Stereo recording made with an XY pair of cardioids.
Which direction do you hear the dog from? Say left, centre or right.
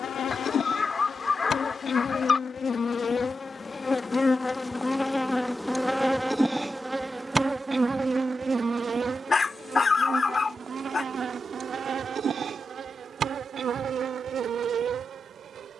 left.